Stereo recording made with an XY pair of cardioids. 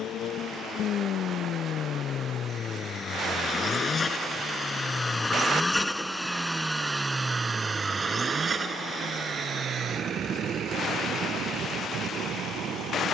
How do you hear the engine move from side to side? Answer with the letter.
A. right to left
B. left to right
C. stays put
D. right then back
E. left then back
B.